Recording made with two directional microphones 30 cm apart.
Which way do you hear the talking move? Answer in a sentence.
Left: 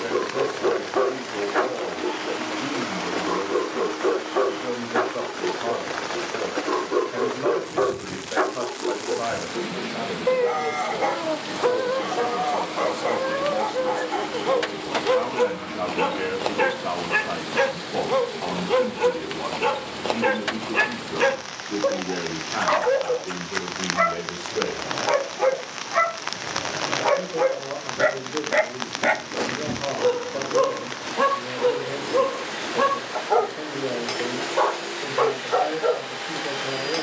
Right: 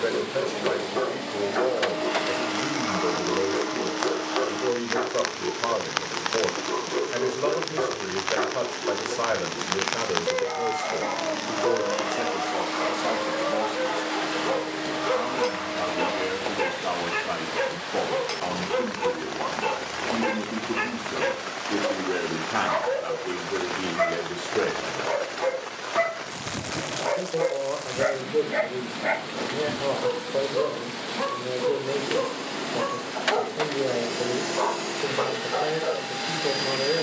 In this clip you hear the talking go left and come back.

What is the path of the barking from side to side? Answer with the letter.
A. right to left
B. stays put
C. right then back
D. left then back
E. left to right
B.